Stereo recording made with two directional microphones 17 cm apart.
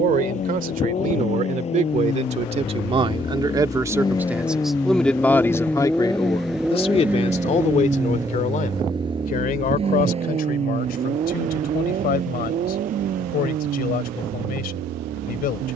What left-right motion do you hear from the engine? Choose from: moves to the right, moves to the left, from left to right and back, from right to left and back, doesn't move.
moves to the right.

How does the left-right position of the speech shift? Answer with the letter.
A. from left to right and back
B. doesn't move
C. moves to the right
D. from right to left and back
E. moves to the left
E.